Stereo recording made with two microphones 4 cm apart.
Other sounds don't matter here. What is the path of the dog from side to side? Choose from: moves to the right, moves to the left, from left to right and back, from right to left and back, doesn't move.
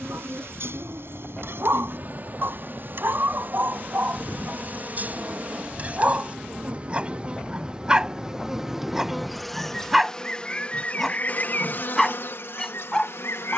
moves to the left.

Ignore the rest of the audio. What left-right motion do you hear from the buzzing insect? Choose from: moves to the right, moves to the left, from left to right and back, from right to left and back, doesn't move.
moves to the left.